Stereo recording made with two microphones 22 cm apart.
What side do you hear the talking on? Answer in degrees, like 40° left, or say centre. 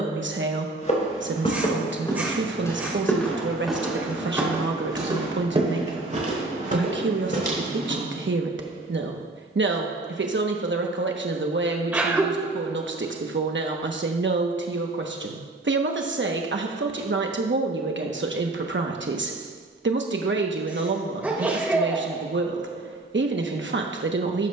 60° right.